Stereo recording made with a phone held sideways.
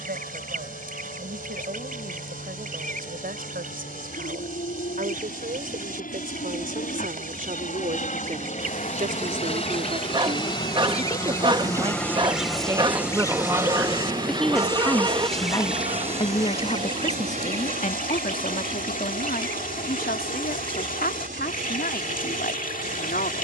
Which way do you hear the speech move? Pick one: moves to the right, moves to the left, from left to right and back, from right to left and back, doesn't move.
moves to the left.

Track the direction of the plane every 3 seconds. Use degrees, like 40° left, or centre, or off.
70° left, 70° left, 50° left, 30° left, 10° right, 40° right, 60° right, 60° right.